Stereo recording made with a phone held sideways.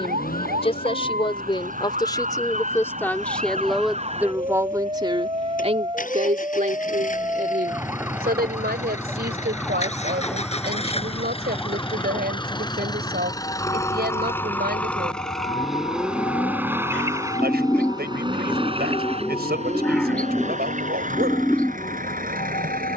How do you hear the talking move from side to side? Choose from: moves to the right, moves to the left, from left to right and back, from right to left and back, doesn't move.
moves to the right.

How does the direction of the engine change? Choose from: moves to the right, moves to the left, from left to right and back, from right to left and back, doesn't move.
moves to the right.